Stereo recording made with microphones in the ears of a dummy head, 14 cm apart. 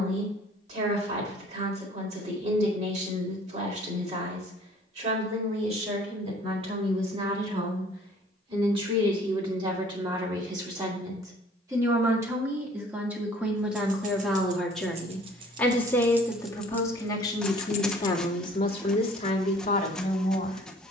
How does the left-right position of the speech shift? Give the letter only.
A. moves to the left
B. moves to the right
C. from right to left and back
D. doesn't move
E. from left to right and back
A.